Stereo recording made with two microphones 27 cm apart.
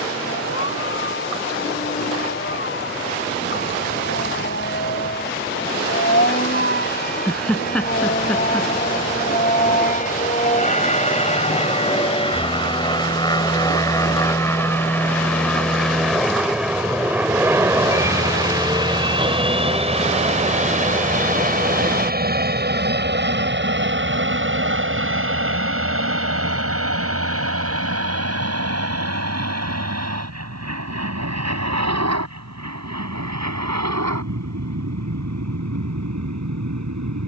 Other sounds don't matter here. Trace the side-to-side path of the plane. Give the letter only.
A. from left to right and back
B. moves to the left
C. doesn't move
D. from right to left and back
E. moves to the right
E.